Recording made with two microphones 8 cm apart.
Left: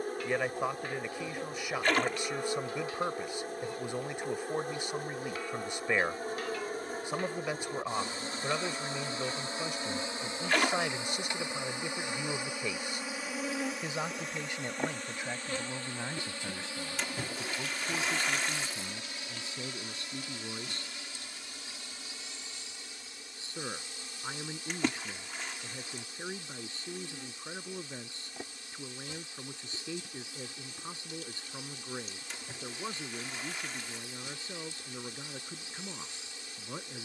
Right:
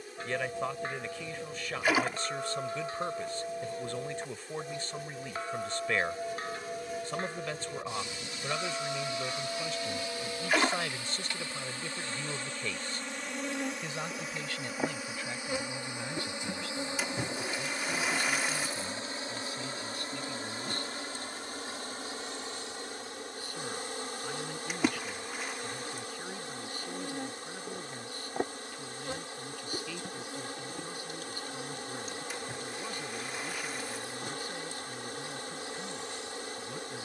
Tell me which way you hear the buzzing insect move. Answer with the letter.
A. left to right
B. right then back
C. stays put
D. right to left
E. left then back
A.